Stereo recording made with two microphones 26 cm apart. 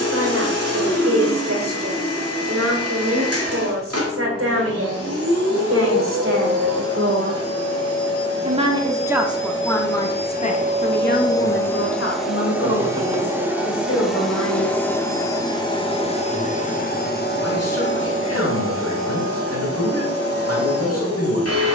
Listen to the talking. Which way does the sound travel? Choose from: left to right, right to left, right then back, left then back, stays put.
right to left.